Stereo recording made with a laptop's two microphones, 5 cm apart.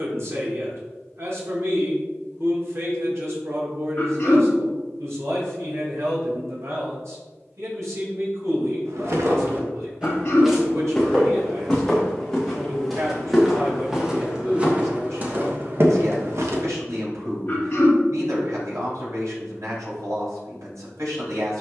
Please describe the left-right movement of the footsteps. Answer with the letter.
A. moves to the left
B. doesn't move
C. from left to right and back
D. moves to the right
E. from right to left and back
E.